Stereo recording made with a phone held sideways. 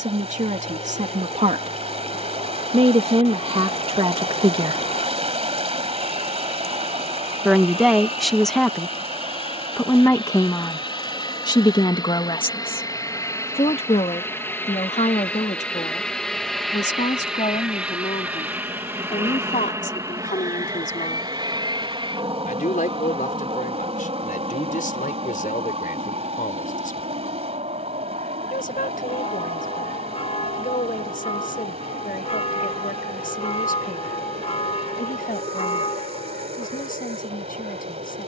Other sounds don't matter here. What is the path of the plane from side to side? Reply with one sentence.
You can hear the plane travel towards the right.